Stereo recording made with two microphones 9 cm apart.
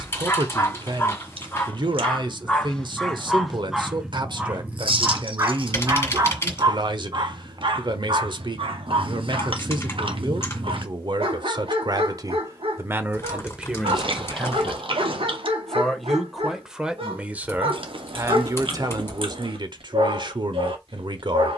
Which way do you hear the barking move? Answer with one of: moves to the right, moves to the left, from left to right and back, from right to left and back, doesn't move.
moves to the right.